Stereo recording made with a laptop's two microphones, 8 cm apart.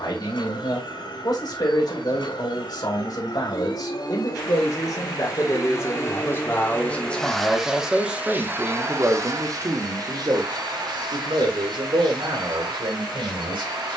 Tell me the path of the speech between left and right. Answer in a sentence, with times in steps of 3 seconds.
In this clip you hear the speech on the left from 0 s, in the centre from 6 s and on the right from 9 s.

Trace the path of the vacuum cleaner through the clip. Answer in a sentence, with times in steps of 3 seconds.
In this clip you hear the vacuum cleaner on the left from 0 s, in the centre from 6 s and on the right from 9 s.